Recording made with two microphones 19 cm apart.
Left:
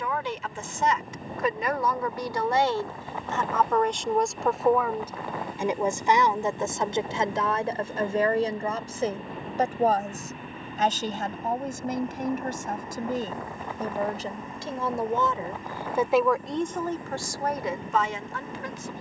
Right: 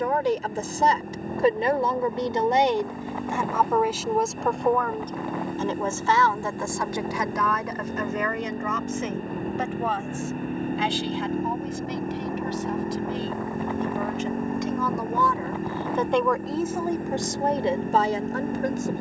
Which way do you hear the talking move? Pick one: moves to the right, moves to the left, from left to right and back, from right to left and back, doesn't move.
from right to left and back.